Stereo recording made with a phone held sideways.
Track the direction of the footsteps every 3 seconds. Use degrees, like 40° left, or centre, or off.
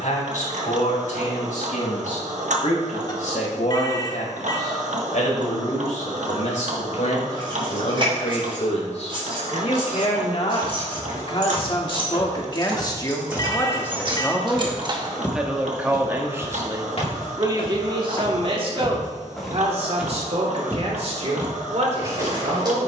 off, off, off, 40° right, 20° right, 40° left, centre, 30° right.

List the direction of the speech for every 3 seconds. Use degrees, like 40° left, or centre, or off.
80° left, 70° left, 60° left, 50° left, 20° left, 20° right, 50° right, 60° right.